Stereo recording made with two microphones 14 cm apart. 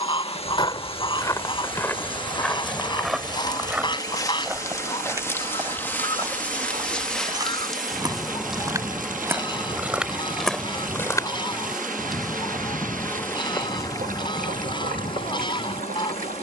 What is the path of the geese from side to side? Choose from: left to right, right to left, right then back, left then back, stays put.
stays put.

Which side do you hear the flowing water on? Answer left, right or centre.
right.